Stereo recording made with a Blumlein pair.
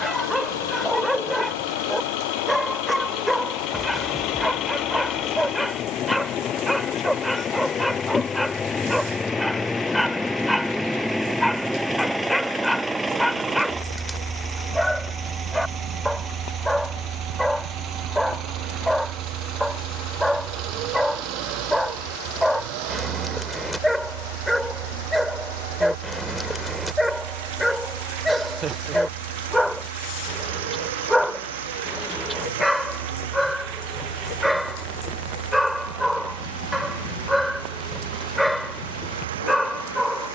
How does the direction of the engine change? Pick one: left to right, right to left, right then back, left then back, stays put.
left to right.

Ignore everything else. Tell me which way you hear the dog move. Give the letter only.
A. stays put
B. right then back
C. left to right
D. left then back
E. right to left
A.